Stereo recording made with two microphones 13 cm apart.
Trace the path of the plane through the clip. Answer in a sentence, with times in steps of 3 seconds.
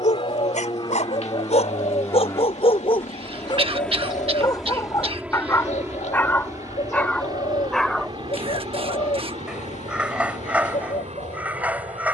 In this clip you hear the plane on the left from 0 s, in the centre from 3 s and on the right from 6 s.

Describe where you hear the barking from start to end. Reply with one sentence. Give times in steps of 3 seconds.
In this clip you hear the barking on the left from 0 s and in the centre from 6 s.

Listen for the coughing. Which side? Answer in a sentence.
In this clip you hear the coughing on the right.